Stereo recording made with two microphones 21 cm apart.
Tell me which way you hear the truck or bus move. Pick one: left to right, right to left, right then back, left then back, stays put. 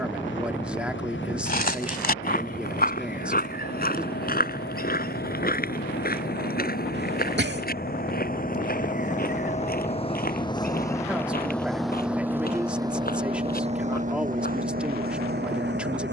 left to right.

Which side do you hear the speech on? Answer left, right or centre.
centre.